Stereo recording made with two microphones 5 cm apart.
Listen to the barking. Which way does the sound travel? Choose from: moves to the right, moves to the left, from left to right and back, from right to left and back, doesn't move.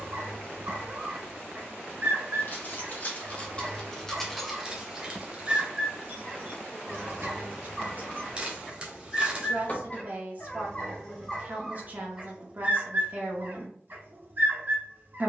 from right to left and back.